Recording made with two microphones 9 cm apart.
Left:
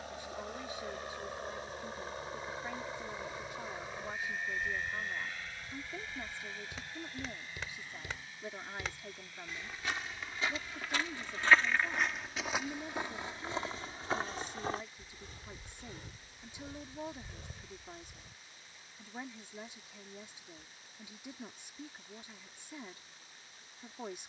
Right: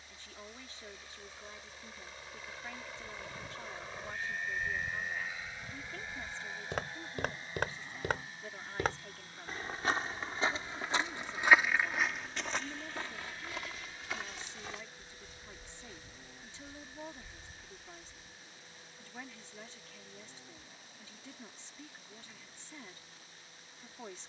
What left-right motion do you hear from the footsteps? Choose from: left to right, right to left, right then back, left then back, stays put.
right to left.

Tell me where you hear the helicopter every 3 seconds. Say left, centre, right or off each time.
left, centre, right, right, right, right, right, right.